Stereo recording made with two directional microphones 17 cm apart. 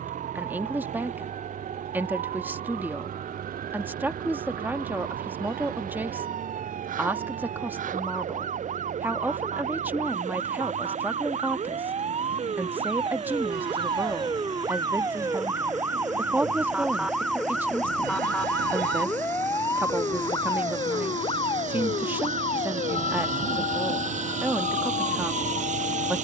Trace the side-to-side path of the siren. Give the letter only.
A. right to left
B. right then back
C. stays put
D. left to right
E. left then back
A.